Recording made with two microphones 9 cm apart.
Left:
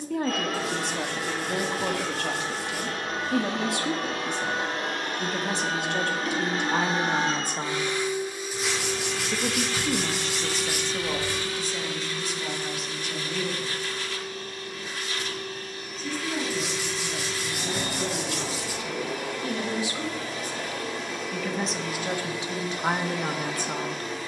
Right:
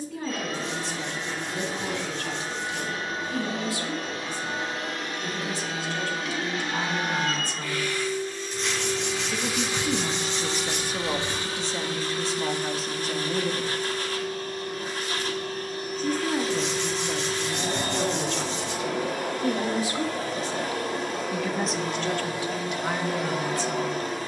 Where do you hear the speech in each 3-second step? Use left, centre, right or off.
left, left, left, centre, right, right, right, left.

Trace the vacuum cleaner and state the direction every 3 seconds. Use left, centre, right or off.
left, left, left, right, right, right, right, right.